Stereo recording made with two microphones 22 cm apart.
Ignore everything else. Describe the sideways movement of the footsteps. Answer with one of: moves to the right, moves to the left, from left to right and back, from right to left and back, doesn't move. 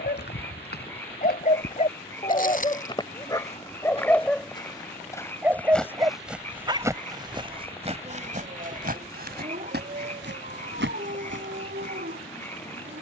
moves to the right.